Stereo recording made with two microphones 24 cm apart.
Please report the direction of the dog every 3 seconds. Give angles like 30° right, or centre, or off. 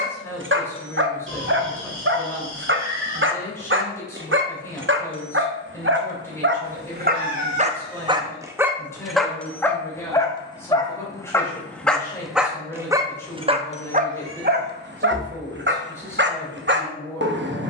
50° right, 50° right, 30° right, 10° left, 20° right, 50° right.